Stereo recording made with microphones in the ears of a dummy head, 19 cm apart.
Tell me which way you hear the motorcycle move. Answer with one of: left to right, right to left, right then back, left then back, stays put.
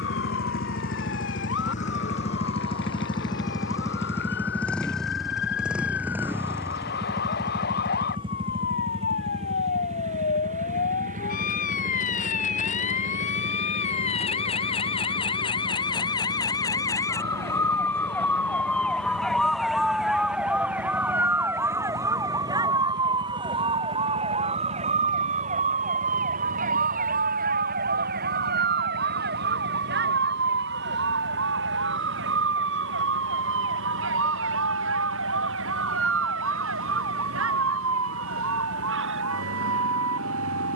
left to right.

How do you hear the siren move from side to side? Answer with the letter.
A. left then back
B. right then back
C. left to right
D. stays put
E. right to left
C.